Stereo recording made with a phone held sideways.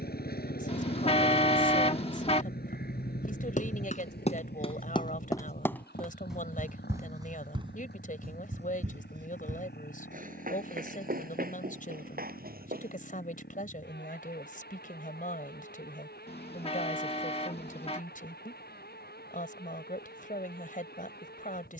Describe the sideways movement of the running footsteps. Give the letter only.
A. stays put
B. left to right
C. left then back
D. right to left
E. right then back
B.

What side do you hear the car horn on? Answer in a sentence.
In this clip you hear the car horn on the left.